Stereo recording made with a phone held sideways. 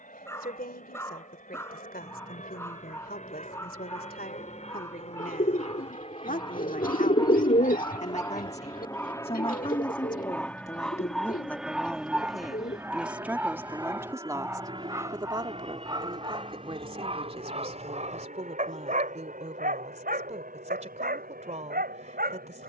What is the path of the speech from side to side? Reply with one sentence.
In this clip you hear the speech move from left to right.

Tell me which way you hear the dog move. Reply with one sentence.
You can hear the dog move from left to right.